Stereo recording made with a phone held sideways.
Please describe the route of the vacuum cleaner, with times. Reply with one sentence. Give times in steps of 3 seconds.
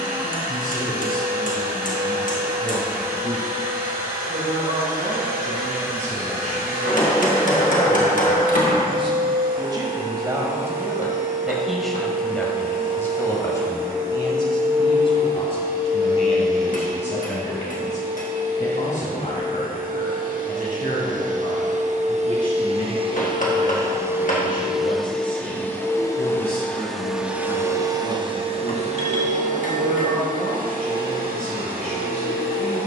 You can hear the vacuum cleaner on the right from 0 s, in the centre from 24 s and on the right from 27 s.